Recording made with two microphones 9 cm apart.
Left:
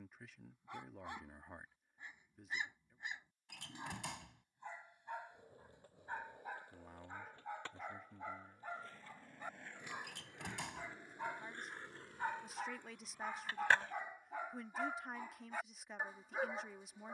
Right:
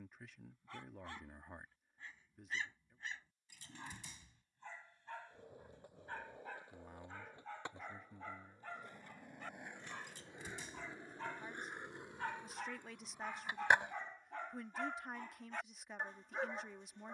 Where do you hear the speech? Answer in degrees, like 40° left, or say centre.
centre.